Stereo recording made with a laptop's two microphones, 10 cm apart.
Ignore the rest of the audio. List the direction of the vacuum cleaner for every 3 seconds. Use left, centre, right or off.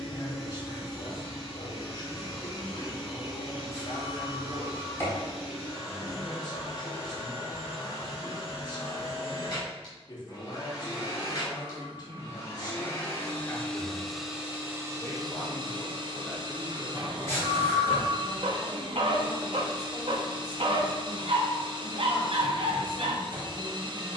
left, left, left, left, centre, right, right, right.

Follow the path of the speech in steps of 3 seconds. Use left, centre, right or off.
left, left, left, left, left, centre, right, right.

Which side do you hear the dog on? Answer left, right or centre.
right.